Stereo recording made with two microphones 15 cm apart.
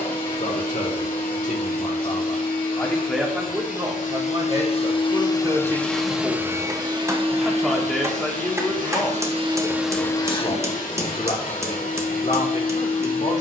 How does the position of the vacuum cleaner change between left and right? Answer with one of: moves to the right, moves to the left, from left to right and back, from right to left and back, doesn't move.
from left to right and back.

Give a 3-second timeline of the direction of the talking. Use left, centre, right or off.
left, right, centre, left, left.